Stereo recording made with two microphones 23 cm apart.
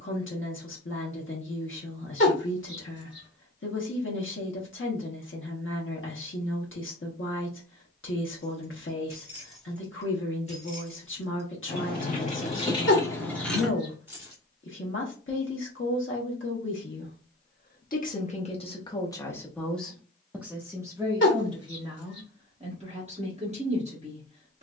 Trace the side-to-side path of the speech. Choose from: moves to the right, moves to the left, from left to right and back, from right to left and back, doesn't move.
moves to the right.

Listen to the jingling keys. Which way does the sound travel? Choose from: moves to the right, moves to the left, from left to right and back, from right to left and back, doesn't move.
from right to left and back.